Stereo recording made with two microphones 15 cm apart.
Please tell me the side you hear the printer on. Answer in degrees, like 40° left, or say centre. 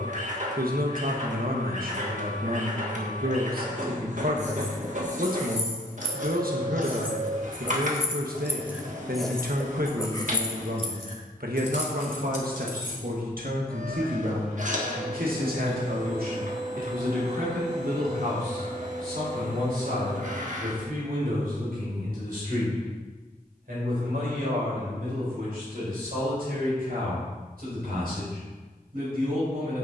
60° right.